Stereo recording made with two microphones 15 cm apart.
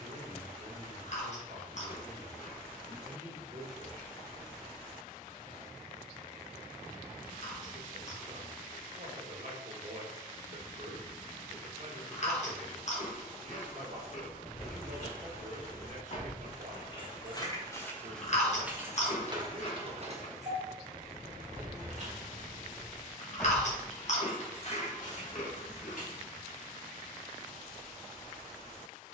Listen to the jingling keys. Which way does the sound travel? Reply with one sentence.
In this clip you hear the jingling keys move from left to right and back again.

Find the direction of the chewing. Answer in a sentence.
In this clip you hear the chewing on the left.